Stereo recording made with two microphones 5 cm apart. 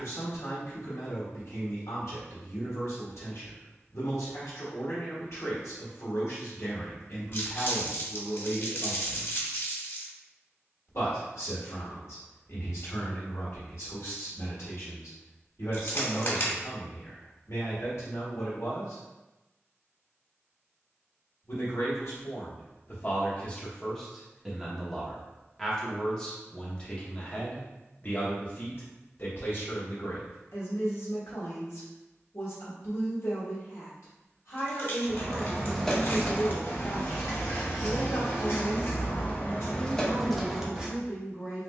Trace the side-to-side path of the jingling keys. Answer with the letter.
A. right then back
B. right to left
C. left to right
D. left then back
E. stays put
D.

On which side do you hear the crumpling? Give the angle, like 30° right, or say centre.
50° left.